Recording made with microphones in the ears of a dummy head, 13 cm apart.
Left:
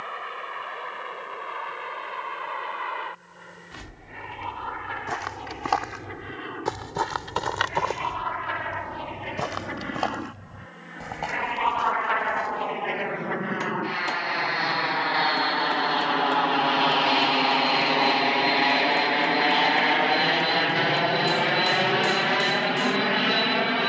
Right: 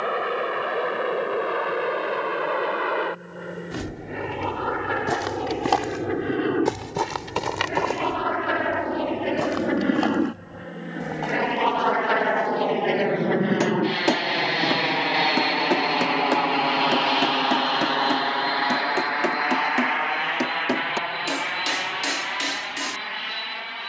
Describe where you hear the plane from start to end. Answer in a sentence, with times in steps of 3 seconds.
In this clip you hear the plane on the right from 0 s, in the centre from 15 s and on the left from 18 s.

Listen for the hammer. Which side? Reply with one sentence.
In this clip you hear the hammer on the right.